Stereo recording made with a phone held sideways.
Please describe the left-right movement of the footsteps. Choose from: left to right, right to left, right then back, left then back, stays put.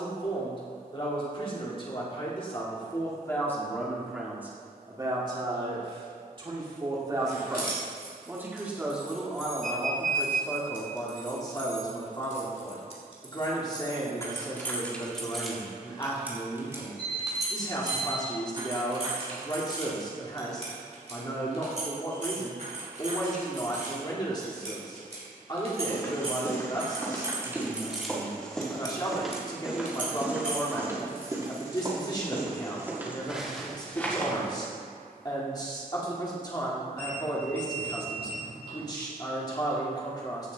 right then back.